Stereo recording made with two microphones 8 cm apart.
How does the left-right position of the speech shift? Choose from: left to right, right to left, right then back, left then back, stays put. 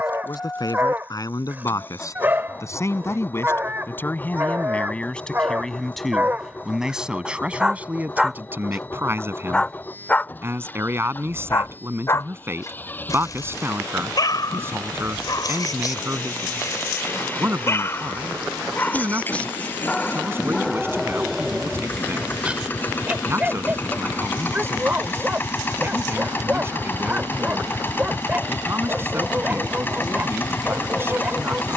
left to right.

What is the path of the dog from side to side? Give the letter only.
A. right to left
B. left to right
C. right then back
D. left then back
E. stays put
D.